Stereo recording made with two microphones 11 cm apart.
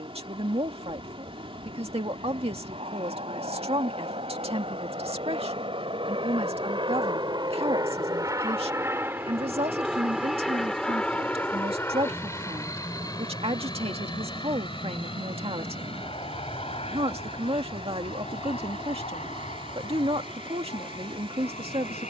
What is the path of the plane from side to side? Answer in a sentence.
You can hear the plane move to the left.